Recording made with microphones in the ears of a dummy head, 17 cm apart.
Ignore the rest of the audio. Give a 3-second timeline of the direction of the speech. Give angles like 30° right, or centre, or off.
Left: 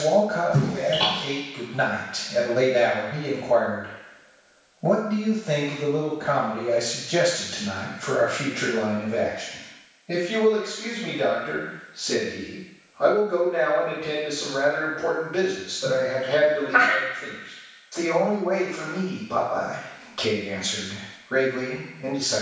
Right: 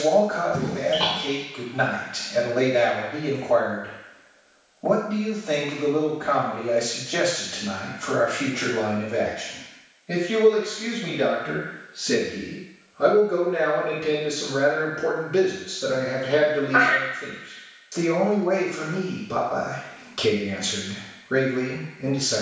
20° left, 20° left, 10° left, 10° right, 30° right, 30° right, 30° right, 30° right.